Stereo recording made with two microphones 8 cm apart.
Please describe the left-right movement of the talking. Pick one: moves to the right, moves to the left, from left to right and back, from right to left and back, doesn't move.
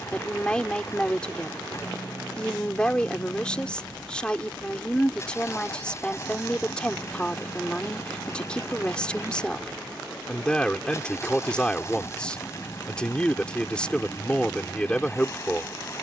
doesn't move.